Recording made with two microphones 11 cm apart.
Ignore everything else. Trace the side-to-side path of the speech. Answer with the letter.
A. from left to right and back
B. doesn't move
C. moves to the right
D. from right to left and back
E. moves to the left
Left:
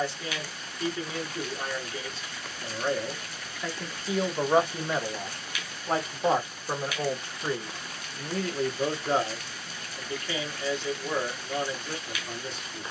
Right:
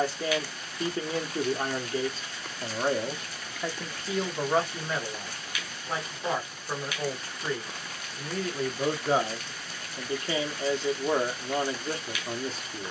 D.